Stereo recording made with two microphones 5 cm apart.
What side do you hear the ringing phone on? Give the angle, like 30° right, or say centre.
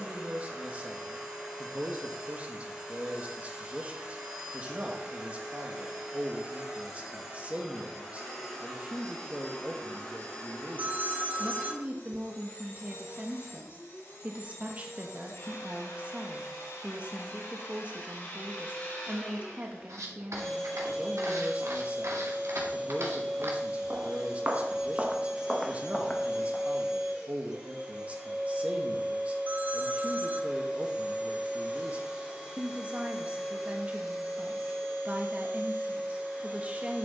40° right.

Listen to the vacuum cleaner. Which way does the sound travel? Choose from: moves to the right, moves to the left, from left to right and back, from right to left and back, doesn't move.
from right to left and back.